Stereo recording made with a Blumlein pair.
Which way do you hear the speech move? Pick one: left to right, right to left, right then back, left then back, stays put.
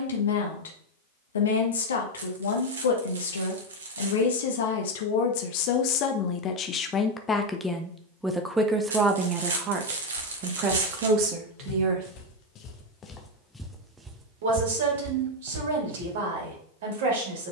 left to right.